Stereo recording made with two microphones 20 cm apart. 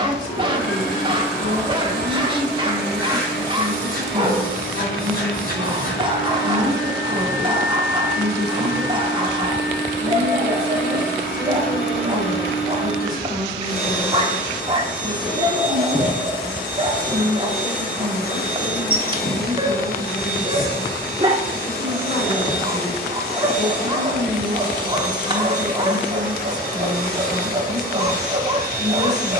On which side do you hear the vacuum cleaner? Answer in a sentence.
In this clip you hear the vacuum cleaner on the left.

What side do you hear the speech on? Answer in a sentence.
You can hear the speech on the left.